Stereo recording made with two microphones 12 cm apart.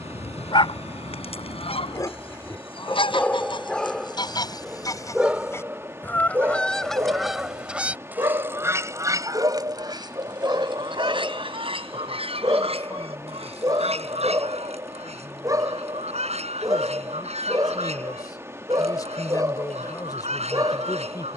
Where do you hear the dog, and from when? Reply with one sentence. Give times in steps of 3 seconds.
In this clip you hear the dog on the left from 0 s, in the centre from 3 s and on the right from 6 s.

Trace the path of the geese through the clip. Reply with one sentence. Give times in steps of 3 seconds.
In this clip you hear the geese on the left from 0 s, in the centre from 6 s and on the right from 9 s.